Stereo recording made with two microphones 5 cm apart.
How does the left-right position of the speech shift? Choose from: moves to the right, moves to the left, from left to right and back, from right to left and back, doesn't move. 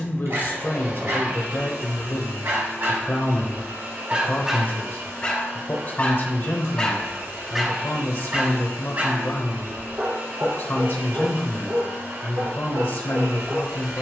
doesn't move.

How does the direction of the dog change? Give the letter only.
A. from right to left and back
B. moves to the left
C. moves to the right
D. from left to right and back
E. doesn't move
A.